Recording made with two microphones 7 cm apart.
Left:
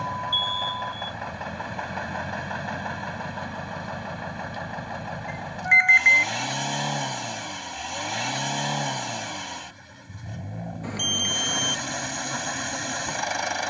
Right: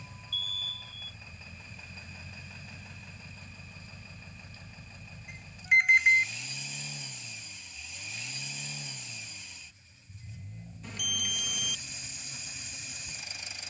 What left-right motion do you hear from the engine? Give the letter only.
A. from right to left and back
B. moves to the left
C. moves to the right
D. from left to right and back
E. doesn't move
E.